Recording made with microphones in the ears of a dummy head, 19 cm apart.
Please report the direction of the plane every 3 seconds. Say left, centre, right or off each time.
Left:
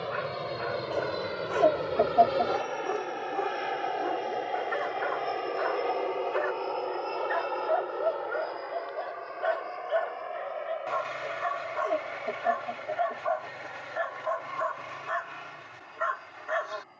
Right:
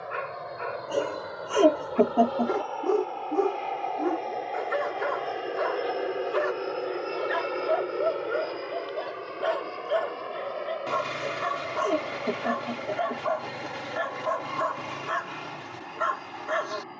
left, centre, right, right, right, right.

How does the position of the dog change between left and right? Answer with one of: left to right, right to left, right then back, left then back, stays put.
stays put.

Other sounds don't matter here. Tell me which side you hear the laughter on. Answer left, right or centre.
right.